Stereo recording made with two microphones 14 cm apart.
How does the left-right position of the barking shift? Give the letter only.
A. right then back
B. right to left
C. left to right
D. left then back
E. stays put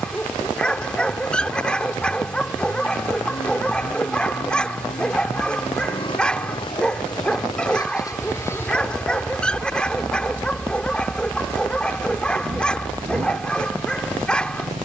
E.